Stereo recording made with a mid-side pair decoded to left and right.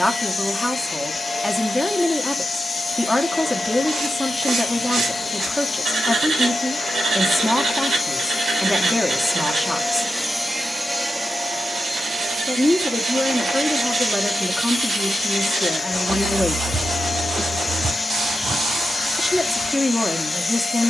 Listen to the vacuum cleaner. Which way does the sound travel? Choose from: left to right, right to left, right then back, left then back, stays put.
right then back.